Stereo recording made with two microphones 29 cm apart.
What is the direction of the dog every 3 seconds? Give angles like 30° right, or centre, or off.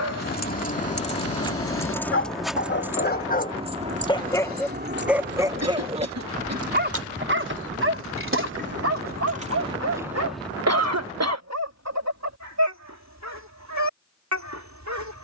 50° left, 10° left, 40° right, 60° right, 70° right.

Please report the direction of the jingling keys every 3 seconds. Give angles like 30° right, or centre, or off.
10° left, 30° right, 50° right, 10° right, off.